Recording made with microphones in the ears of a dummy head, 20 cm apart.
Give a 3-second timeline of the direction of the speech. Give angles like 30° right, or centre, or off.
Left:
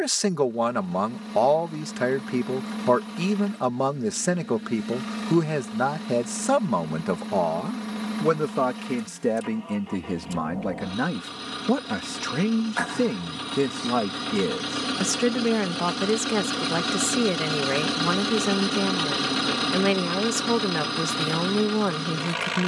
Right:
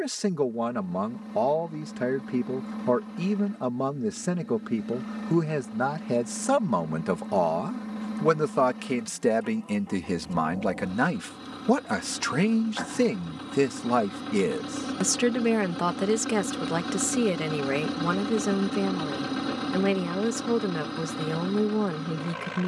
40° left, 30° left, centre, 20° right, 20° right, centre, 20° left, 30° left.